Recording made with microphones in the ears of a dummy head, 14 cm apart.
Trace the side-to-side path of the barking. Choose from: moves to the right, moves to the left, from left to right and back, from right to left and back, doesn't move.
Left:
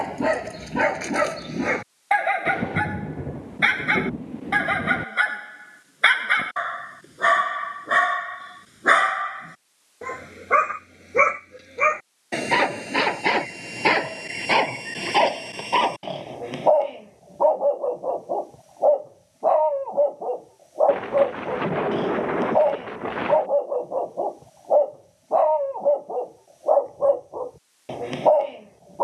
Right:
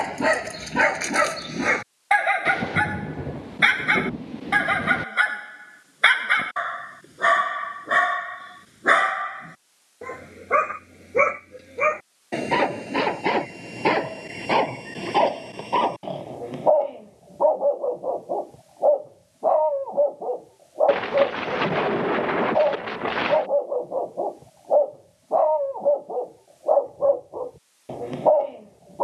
moves to the left.